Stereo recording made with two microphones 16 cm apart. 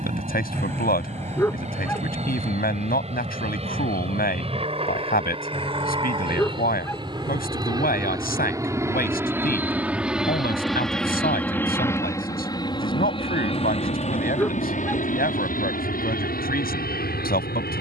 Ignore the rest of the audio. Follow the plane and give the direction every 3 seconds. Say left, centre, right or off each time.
right, right, right, centre, left, left.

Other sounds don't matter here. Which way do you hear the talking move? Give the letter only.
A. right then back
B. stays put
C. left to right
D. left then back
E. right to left
B.